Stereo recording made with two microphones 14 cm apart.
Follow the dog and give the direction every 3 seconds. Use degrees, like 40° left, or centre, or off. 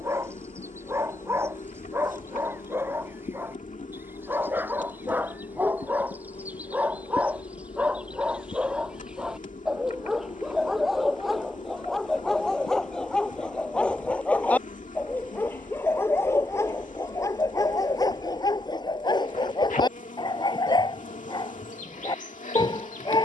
20° right, 10° right, 10° right, centre, 10° left, 20° left, 30° left, 30° left.